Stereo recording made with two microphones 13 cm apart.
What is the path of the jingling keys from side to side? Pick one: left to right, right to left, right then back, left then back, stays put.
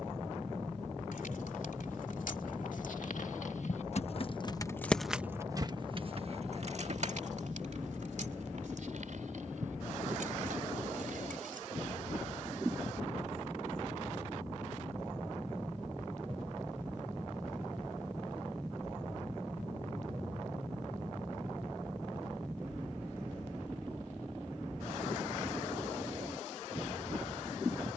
left to right.